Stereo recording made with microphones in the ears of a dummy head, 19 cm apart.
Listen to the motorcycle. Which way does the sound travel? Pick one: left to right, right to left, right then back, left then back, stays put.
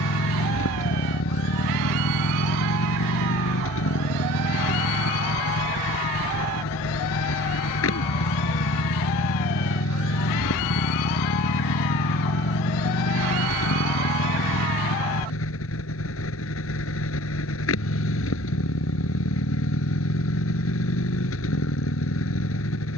stays put.